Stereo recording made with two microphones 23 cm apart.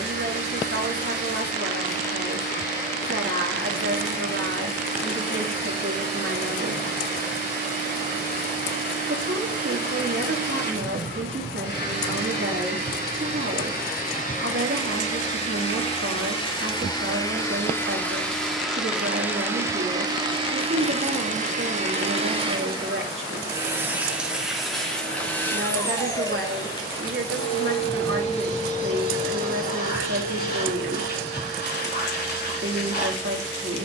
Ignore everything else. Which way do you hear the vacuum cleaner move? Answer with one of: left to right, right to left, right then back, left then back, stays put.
right then back.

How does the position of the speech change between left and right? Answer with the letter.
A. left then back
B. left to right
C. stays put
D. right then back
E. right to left
C.